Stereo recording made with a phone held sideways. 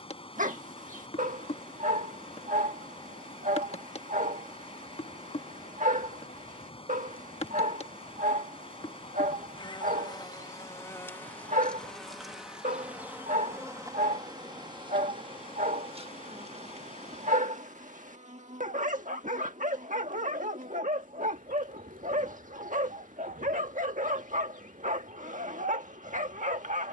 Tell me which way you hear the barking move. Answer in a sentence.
In this clip you hear the barking stay in one place.